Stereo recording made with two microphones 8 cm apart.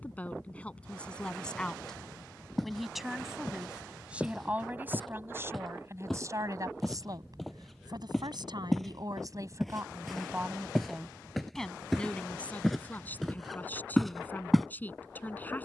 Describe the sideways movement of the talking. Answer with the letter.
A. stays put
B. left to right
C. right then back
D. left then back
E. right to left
C.